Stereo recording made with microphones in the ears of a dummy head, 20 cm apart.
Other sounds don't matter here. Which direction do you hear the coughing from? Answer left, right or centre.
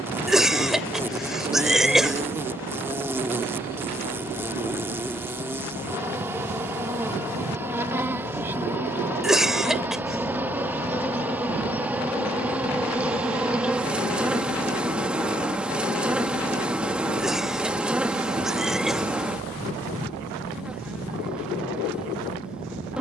centre.